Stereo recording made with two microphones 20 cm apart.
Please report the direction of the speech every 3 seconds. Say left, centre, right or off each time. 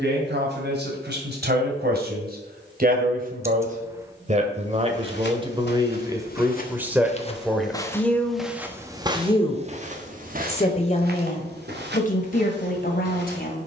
right, right, centre, left, left.